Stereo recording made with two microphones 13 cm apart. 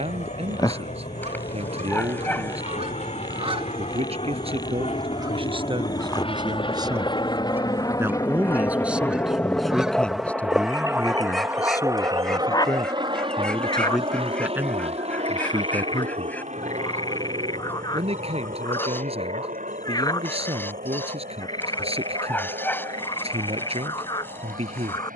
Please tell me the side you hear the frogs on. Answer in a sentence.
In this clip you hear the frogs on the left.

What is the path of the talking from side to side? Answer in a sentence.
You can hear the talking move from right to left and back again.